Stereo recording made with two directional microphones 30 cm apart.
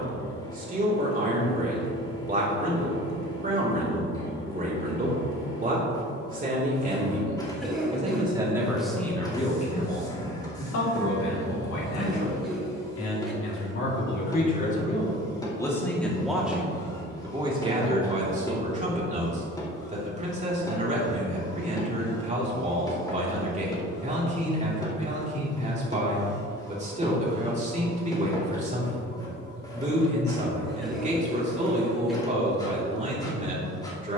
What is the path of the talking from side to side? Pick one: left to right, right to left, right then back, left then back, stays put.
left then back.